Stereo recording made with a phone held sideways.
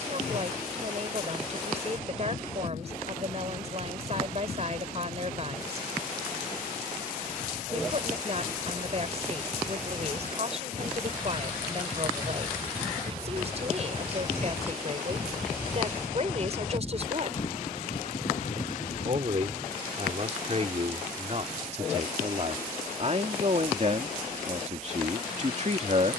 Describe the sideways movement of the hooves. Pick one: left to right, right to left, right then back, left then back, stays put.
right to left.